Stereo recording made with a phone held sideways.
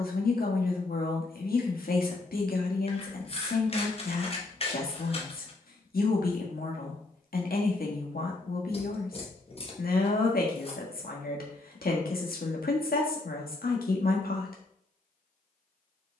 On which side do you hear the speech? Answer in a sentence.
In this clip you hear the speech on the left.